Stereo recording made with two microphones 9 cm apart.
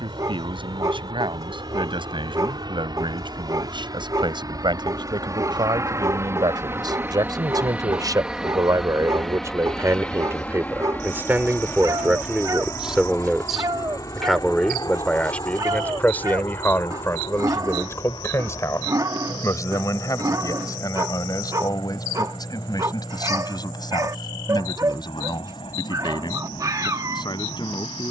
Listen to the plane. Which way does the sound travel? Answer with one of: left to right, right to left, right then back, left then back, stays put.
right to left.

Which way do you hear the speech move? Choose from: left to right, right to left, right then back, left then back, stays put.
right to left.